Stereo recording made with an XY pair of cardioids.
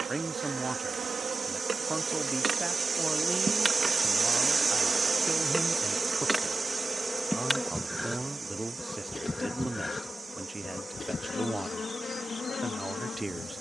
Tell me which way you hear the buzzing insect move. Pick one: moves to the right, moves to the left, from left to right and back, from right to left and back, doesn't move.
moves to the left.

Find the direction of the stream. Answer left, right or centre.
right.